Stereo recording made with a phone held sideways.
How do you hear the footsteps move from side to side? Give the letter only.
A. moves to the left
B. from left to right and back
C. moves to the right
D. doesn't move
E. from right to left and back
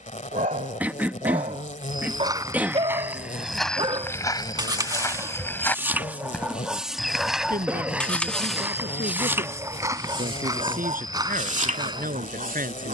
E.